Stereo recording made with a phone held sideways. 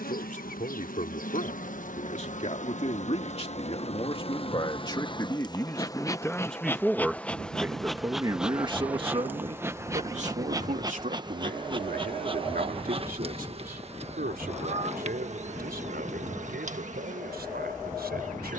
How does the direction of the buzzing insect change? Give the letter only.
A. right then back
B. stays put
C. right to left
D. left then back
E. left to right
E.